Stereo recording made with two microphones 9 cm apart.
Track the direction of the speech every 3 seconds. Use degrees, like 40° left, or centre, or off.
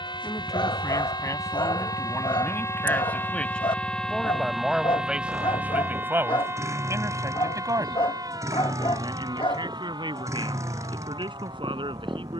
30° left, centre, 40° right, 60° right.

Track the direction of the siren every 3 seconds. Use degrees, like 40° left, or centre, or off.
50° left, centre, 40° right, 50° right.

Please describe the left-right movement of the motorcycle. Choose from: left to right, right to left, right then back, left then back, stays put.
stays put.